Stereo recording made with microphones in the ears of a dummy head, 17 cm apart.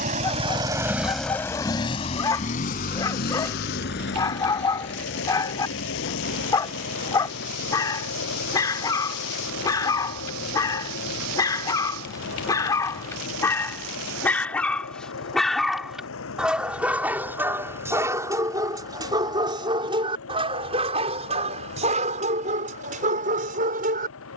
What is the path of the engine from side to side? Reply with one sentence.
In this clip you hear the engine go from the right side to the left.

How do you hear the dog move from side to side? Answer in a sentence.
In this clip you hear the dog move to the right.